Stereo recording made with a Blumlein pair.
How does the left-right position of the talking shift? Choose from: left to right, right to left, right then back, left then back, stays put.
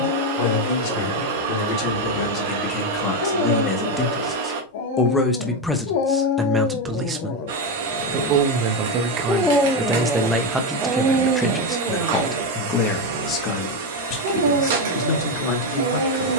right then back.